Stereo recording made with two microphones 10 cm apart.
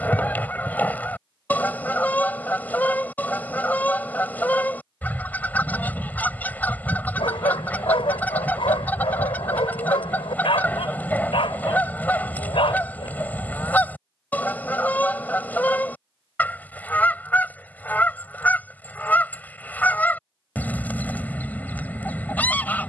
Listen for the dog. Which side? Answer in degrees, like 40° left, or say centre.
70° left.